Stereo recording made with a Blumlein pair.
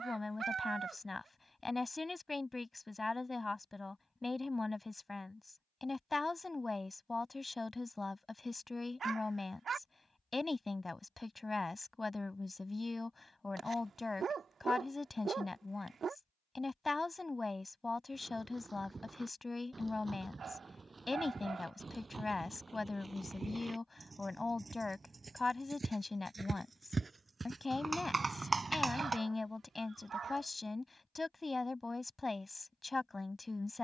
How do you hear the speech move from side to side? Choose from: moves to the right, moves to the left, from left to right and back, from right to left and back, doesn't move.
doesn't move.